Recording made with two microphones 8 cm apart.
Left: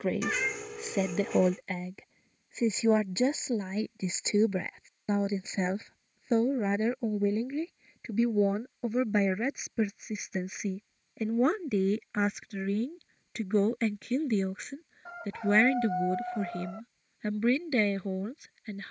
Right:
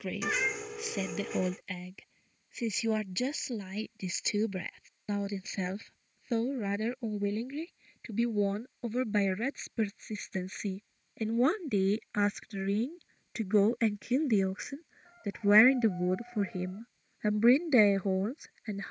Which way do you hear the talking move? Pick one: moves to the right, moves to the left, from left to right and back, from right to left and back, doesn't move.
moves to the right.